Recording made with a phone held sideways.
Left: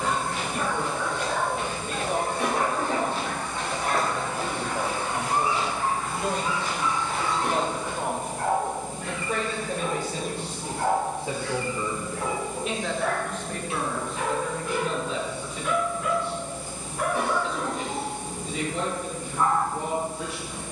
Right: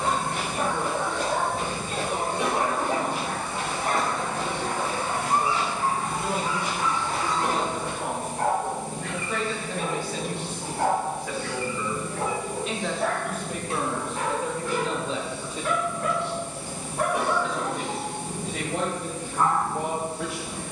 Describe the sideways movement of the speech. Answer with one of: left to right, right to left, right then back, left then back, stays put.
left to right.